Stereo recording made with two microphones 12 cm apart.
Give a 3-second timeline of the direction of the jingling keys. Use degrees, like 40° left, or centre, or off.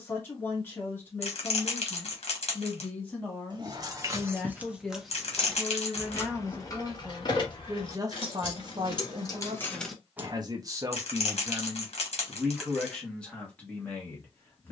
off, 10° right, 40° left, 10° left, off.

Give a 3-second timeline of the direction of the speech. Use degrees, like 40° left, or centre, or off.
20° left, 10° left, 20° right, 30° right, 10° left.